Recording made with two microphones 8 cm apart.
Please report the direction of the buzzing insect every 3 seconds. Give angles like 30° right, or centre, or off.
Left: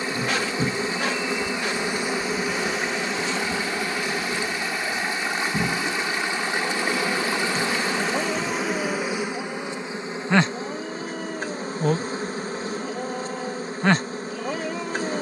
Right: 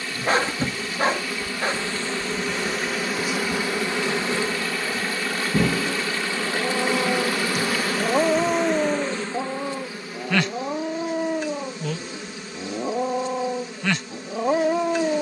20° left, 30° right, 10° right, 30° left, 40° left.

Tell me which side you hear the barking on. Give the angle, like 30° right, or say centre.
40° right.